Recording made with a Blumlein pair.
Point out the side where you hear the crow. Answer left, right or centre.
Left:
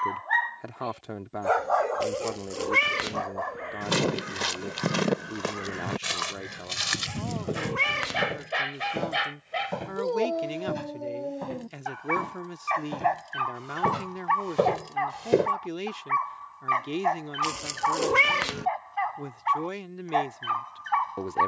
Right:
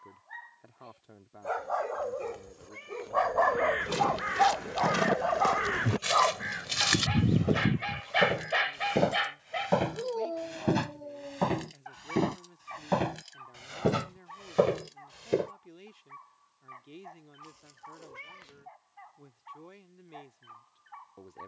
right.